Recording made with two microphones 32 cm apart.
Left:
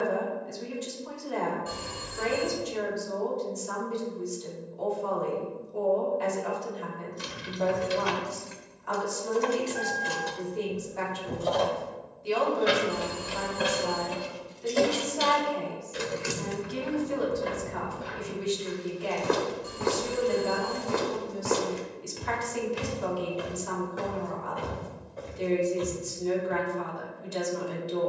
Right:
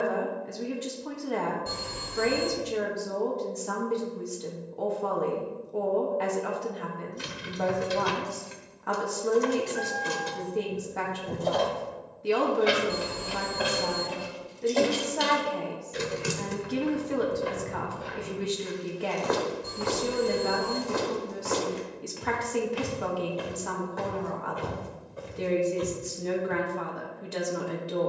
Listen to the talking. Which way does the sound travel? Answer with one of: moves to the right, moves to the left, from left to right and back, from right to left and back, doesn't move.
doesn't move.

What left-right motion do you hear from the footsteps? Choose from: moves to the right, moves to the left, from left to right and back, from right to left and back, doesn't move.
from right to left and back.